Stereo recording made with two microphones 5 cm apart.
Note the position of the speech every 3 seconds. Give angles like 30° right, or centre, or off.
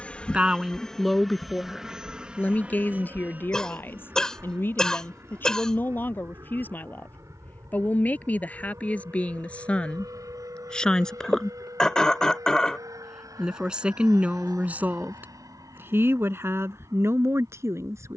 10° left, 40° left, 30° left, 20° left, 20° right, 50° right.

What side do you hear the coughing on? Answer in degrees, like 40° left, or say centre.
10° left.